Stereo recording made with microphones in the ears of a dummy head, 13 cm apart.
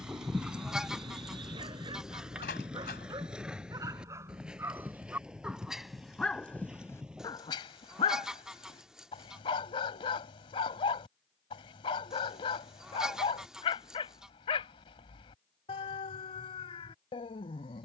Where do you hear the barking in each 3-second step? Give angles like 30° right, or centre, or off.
30° right, 20° right, 30° left, 40° left, 40° left, 40° left.